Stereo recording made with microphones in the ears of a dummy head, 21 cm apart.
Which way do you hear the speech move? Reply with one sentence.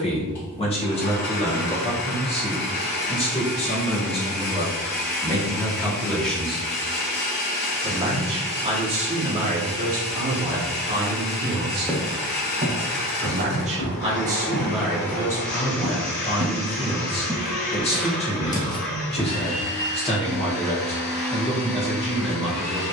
You can hear the speech go right and come back.